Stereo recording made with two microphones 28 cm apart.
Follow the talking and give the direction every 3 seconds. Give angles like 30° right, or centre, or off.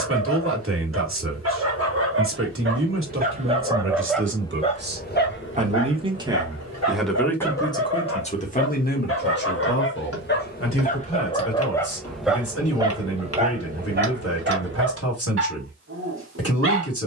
50° right, 40° right, 10° left, 50° left, 60° left, 60° left.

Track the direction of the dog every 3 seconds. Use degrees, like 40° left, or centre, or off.
50° right, 10° left, 60° left, 30° left, 30° right, 50° right.